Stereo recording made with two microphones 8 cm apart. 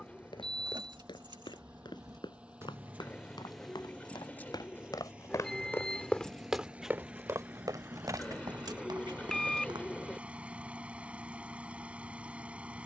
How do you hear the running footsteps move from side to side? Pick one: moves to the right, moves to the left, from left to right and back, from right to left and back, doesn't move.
moves to the right.